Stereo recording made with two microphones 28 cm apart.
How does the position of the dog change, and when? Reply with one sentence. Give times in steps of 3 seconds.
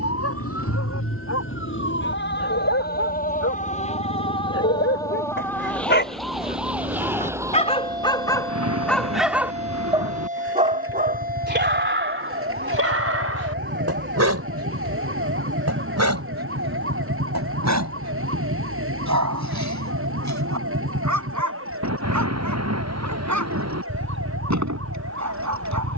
You can hear the dog on the left from 0 s and on the right from 9 s.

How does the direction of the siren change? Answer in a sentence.
In this clip you hear the siren move from left to right.